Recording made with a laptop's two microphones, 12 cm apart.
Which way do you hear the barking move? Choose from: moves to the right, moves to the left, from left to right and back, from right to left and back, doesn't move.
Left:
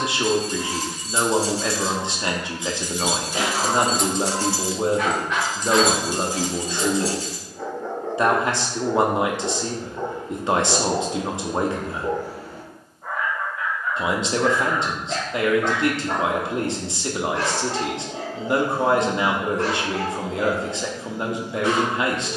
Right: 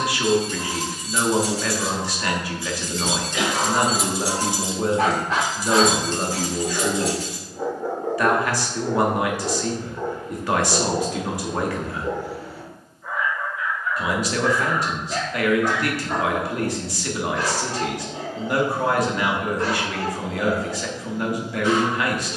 moves to the left.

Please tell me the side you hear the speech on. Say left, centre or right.
left.